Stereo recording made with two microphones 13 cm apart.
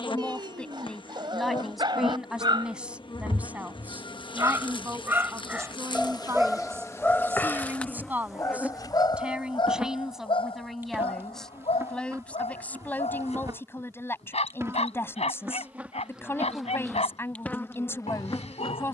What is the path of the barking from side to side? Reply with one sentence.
You can hear the barking move to the left.